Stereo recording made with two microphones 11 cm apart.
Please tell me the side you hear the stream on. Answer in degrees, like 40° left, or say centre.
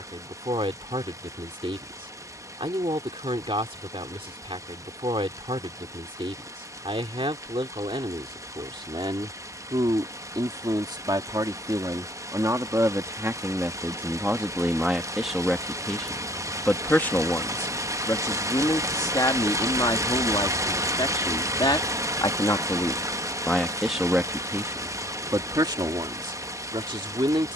30° right.